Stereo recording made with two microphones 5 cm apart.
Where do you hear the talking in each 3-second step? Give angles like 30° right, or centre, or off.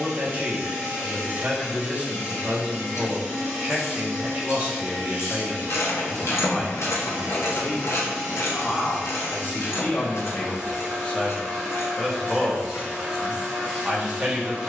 30° right, 20° right, 40° left, 30° left, 20° right.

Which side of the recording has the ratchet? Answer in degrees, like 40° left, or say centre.
70° left.